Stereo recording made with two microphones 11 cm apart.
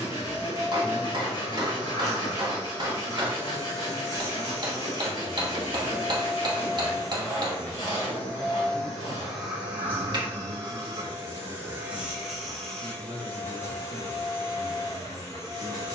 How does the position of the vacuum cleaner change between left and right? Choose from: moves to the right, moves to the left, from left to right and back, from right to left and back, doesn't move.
from left to right and back.